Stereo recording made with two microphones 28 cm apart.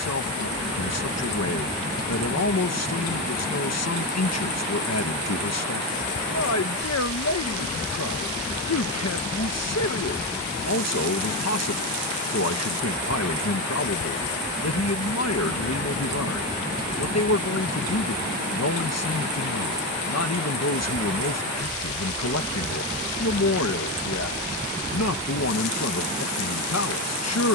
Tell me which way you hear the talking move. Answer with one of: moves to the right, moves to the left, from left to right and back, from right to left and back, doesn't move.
doesn't move.